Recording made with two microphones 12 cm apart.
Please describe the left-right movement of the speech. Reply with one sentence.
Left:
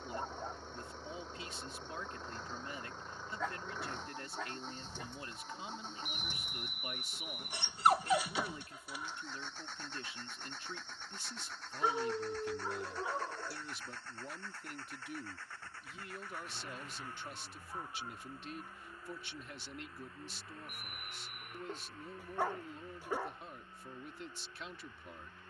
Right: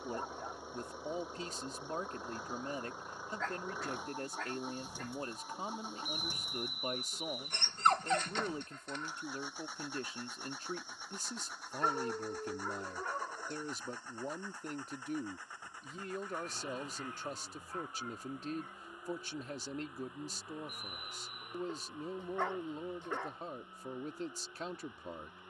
You can hear the speech stay in one place.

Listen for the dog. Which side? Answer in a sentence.
In this clip you hear the dog in the centre.